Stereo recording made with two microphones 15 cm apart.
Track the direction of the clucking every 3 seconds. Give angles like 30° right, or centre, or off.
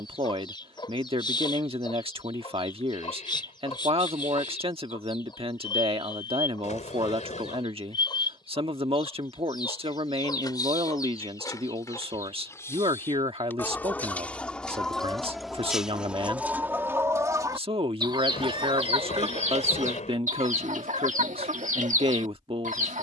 30° left, 30° left, 30° left, 30° left, 10° left, 10° right, 50° right, 60° right.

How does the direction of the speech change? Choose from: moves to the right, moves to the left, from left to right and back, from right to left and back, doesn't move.
doesn't move.